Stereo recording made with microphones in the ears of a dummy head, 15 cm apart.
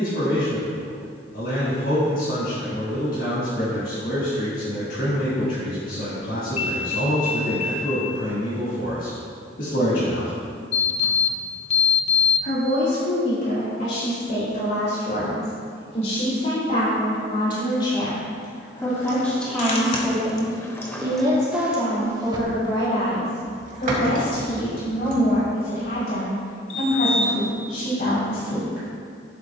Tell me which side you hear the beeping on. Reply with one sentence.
You can hear the beeping on the left.